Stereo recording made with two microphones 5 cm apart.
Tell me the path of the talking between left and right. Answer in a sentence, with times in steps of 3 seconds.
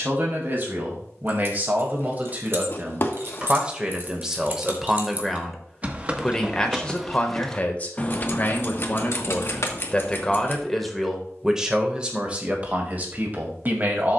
In this clip you hear the talking on the right from 0 s, in the centre from 3 s, on the left from 6 s, in the centre from 9 s and on the right from 12 s.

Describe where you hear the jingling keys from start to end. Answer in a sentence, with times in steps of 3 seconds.
You can hear the jingling keys on the right from 0 s, in the centre from 6 s, on the left from 9 s and not at all from 12 s.